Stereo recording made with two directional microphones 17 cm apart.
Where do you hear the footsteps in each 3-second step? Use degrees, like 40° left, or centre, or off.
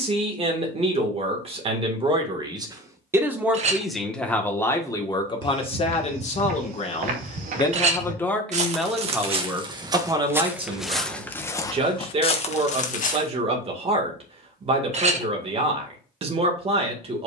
off, 60° right, 50° right, 10° right, 40° left, off.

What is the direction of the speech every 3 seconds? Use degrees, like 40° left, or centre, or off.
30° right, 10° left, 20° left, 20° right, 30° right, 30° right.